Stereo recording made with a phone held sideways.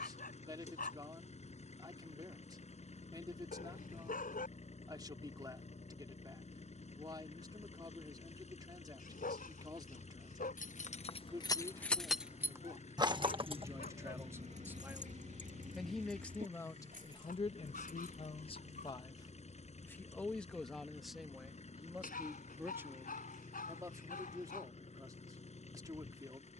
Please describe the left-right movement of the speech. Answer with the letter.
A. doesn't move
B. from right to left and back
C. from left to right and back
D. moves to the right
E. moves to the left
B.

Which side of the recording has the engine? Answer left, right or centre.
left.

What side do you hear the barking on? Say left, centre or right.
left.